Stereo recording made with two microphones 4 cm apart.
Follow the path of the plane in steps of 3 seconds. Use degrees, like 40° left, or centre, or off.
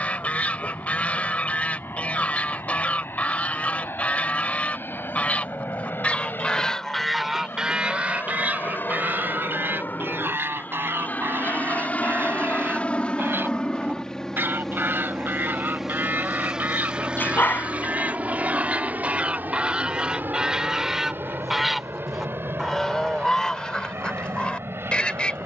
70° left, 70° left, 60° left, 50° left, 20° left, 20° right, 40° right, 60° right, 70° right.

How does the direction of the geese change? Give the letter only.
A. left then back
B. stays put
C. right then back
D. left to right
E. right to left
C.